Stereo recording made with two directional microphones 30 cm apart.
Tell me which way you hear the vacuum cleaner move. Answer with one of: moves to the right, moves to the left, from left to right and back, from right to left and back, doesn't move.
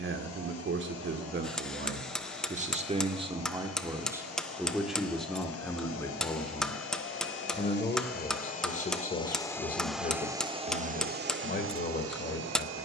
moves to the right.